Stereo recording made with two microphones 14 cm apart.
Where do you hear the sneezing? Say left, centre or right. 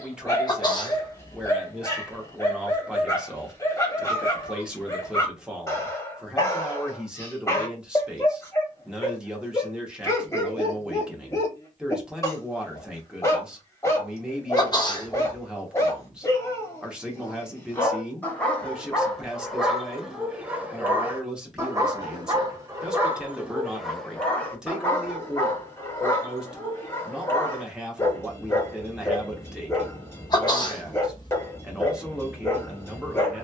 left.